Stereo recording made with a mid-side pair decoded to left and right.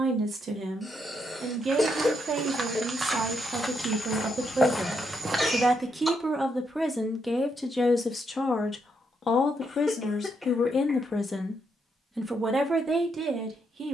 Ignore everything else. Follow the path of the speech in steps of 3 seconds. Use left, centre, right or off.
right, right, centre, left, right.